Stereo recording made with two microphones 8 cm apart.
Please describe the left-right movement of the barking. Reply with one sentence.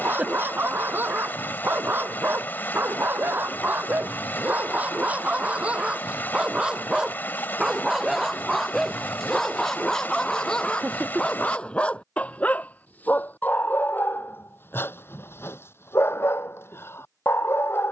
In this clip you hear the barking travel towards the left.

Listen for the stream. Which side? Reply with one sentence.
You can hear the stream on the left.